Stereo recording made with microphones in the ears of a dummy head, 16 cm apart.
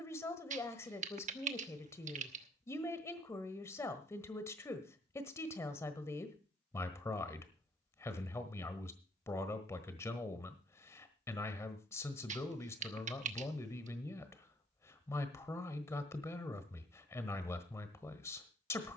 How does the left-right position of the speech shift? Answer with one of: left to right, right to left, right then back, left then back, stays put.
stays put.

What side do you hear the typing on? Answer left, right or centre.
right.